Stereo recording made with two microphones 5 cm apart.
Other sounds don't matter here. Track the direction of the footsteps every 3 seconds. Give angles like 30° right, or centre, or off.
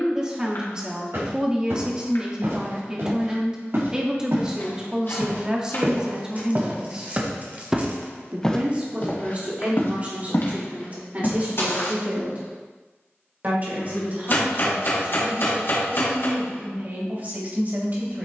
70° right, 60° right, 20° right, 60° left, off, off.